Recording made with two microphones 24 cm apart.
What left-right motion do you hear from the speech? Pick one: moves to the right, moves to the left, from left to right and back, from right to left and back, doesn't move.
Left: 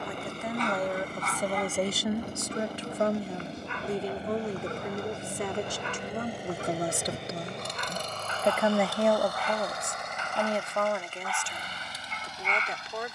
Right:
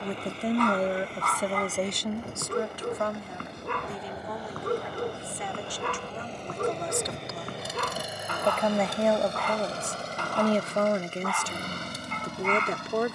from right to left and back.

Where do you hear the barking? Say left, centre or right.
right.